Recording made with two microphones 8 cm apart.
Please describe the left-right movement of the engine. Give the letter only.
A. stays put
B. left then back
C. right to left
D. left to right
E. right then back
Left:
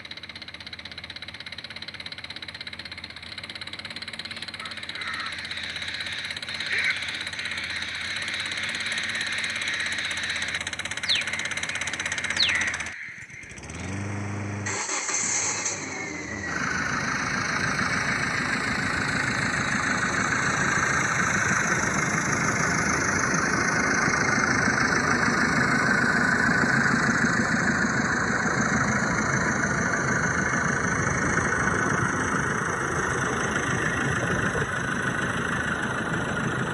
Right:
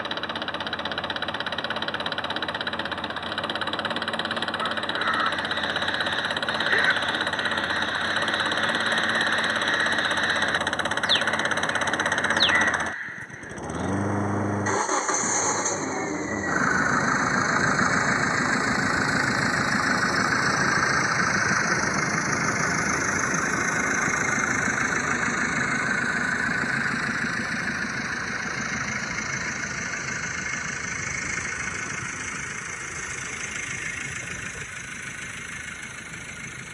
C.